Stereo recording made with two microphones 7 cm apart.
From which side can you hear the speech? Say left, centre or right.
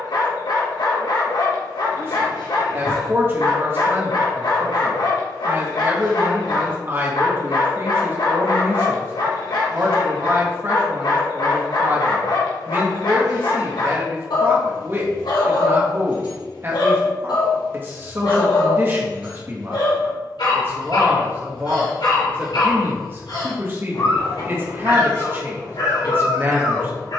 right.